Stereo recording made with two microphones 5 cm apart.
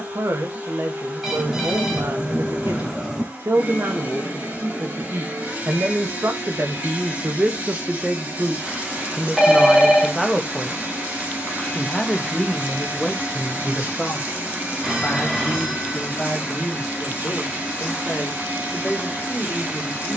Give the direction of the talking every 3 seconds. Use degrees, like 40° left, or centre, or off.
70° right, 70° right, 40° right, centre, 20° left, 30° left, 40° left.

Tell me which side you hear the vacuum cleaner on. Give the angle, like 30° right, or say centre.
30° right.